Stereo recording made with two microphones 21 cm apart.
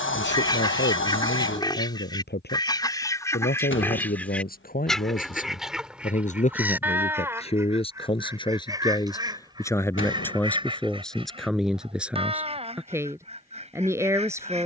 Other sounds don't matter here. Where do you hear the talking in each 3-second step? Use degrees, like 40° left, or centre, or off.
60° left, 40° left, 30° left, 10° left, 10° right.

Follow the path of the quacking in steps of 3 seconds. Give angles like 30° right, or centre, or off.
20° left, 10° left, 10° right, 20° right, 30° right.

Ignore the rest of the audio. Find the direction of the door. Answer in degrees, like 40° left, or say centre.
70° left.